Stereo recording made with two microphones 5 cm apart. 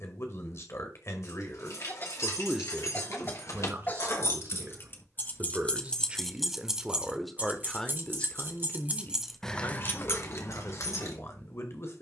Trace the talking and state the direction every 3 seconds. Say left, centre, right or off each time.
left, right, centre, left.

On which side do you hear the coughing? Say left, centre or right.
left.